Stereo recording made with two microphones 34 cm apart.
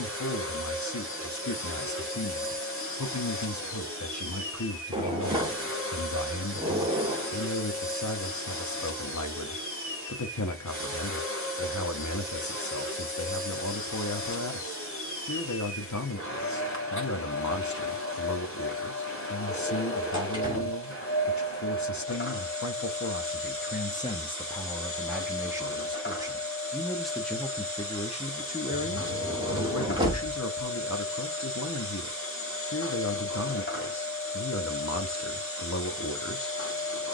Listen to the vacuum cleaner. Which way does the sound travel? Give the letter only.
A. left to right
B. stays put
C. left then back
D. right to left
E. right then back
B.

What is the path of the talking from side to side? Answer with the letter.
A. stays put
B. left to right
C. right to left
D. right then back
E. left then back
D.